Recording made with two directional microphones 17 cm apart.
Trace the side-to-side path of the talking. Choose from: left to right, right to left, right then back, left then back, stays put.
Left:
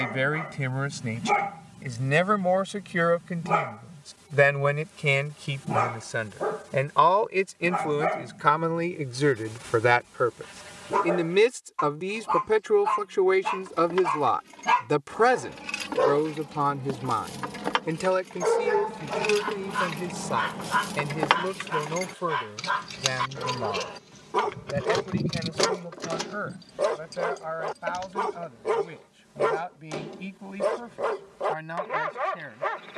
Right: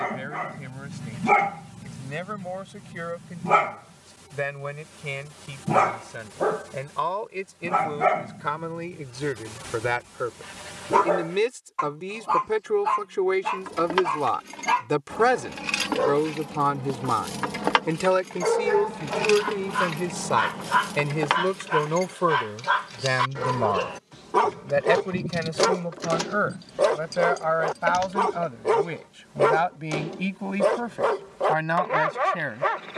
left to right.